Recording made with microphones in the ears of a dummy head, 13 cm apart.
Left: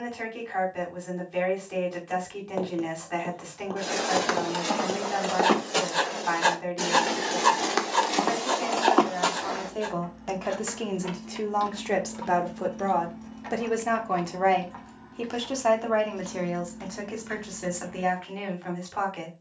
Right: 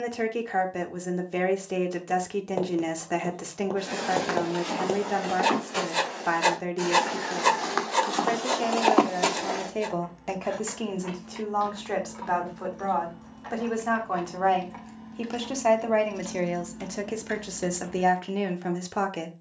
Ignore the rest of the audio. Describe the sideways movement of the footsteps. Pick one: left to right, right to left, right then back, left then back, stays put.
left to right.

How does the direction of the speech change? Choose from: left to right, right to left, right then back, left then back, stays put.
left then back.